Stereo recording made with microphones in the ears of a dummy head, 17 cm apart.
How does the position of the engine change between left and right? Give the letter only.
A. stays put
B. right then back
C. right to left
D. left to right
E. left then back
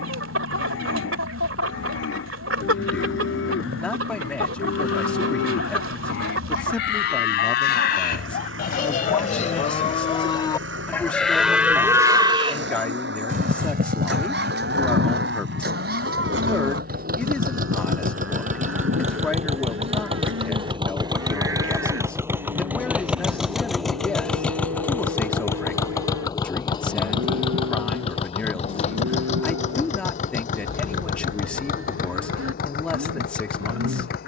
C.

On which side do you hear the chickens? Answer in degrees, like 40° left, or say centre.
80° right.